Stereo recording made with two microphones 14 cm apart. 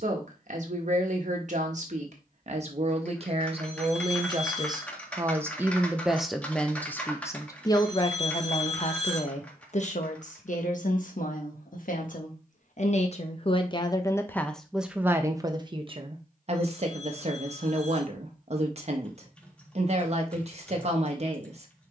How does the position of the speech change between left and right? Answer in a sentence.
In this clip you hear the speech move from right to left and back again.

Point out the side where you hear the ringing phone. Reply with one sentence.
In this clip you hear the ringing phone on the left.